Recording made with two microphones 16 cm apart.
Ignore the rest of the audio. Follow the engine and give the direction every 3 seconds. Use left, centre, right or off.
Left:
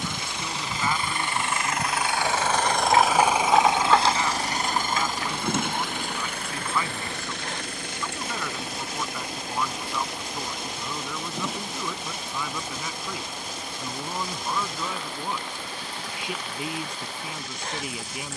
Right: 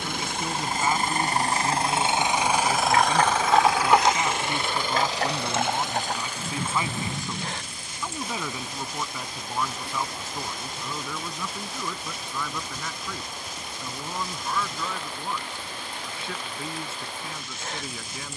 right, left, left, left, left, left.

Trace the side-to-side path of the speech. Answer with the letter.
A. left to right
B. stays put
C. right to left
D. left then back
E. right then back
C.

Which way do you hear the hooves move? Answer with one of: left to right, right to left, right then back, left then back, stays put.
left to right.